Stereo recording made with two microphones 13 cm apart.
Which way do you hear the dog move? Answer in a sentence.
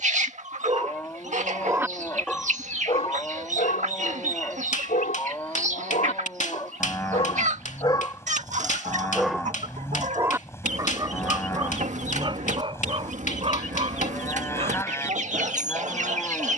In this clip you hear the dog go left and come back.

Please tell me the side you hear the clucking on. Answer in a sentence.
In this clip you hear the clucking on the right.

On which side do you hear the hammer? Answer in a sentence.
You can hear the hammer on the left.